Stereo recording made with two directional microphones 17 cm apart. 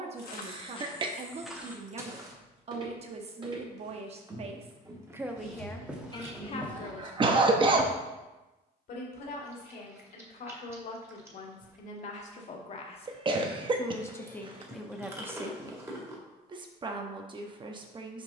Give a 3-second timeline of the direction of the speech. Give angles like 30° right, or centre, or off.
40° right, 20° right, 40° left, 60° left, 20° left, 20° right.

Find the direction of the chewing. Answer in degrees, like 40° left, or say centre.
20° right.